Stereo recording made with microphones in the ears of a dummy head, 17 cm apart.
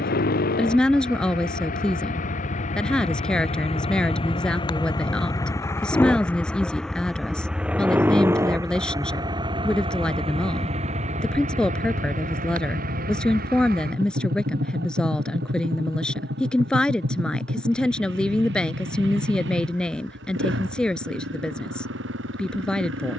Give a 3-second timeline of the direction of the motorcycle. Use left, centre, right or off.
left, left, centre, right, right, right, right, right.